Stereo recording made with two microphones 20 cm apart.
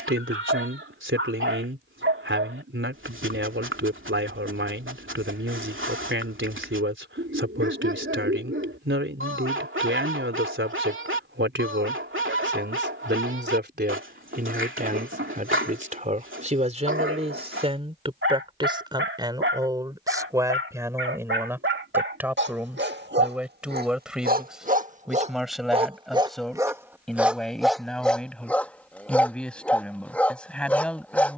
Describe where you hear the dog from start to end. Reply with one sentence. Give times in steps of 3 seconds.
You can hear the dog on the right from 0 s and in the centre from 27 s.